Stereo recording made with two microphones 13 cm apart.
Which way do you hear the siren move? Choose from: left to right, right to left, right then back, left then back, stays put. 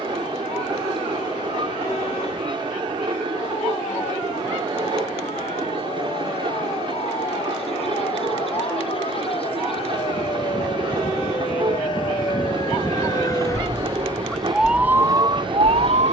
left to right.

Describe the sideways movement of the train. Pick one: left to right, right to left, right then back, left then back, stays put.
stays put.